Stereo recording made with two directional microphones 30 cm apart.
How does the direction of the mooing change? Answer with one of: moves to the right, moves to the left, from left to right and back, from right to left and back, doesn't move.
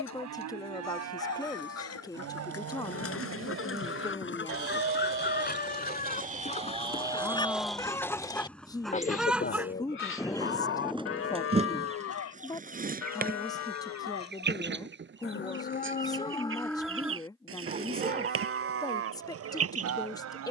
from right to left and back.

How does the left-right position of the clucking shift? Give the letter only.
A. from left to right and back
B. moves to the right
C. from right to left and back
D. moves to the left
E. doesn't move
B.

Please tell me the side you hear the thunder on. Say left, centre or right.
centre.